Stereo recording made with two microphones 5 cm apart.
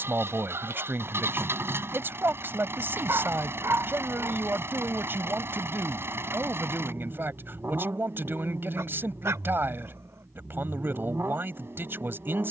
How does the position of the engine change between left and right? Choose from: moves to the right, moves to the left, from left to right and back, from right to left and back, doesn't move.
doesn't move.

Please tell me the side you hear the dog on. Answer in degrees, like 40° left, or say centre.
70° right.